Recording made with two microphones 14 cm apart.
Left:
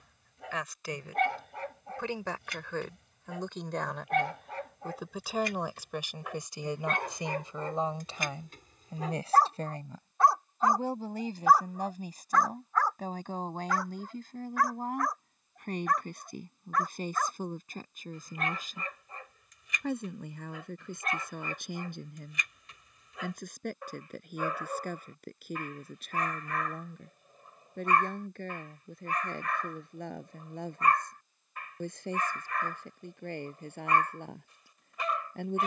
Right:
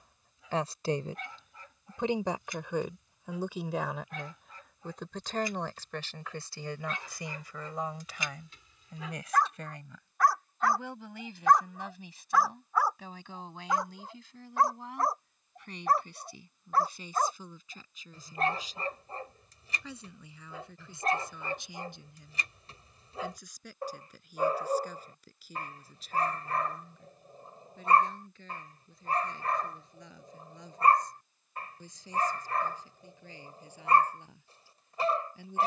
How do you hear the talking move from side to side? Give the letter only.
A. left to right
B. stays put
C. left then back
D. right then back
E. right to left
E.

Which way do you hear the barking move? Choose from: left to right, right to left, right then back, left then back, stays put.
left to right.